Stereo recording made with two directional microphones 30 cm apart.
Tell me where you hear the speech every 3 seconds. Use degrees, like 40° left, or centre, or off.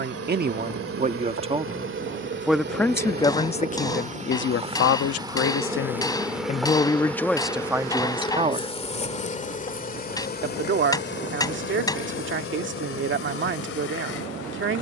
20° right, 40° left, centre, 40° right, 40° right.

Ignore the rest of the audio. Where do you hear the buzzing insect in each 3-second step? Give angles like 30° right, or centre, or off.
40° right, 20° right, 10° left, 30° left, 50° left.